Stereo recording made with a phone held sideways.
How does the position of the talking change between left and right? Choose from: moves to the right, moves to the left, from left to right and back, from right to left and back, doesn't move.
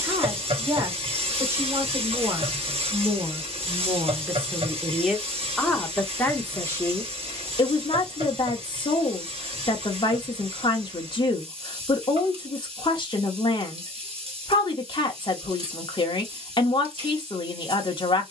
moves to the left.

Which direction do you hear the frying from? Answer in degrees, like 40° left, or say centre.
40° right.